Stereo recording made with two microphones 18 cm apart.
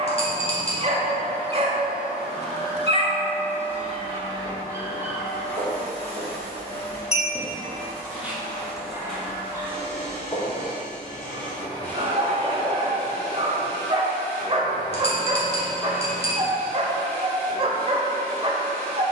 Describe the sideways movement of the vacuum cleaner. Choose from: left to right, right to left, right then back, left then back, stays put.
stays put.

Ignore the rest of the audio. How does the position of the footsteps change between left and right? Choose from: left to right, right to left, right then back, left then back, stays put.
right to left.